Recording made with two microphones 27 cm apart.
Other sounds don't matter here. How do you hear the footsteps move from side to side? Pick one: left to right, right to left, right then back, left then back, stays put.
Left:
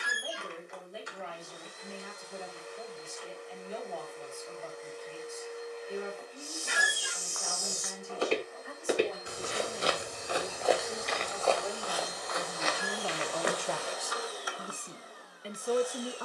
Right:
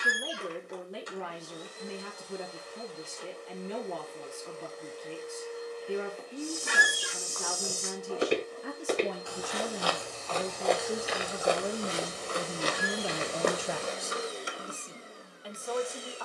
left then back.